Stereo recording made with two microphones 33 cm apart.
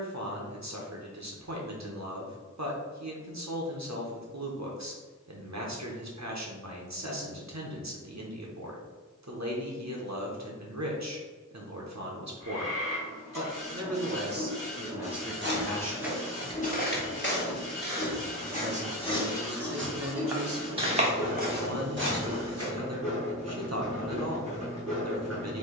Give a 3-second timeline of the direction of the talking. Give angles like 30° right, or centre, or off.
60° right, 60° right, 60° right, 60° right, 50° right, centre, 30° right, 50° right, 50° right.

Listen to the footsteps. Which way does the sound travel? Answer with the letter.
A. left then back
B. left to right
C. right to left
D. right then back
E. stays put
A.